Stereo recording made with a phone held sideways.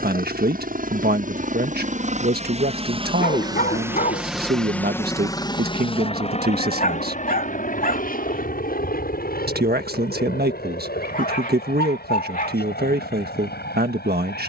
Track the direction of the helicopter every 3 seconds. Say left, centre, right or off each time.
right, centre, left, left, left.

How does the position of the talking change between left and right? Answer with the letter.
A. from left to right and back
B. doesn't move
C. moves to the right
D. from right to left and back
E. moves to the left
B.